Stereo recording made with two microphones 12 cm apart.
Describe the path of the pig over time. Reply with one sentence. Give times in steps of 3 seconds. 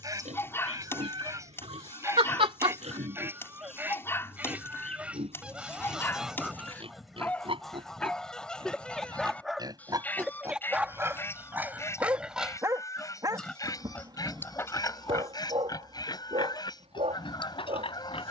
You can hear the pig on the right from 0 s, in the centre from 12 s and on the left from 15 s.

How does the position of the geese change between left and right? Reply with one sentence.
In this clip you hear the geese move from right to left.